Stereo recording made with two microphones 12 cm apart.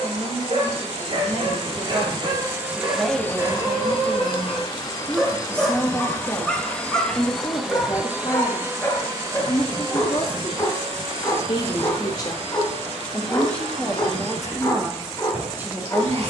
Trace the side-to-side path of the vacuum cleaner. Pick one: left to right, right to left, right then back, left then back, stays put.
left then back.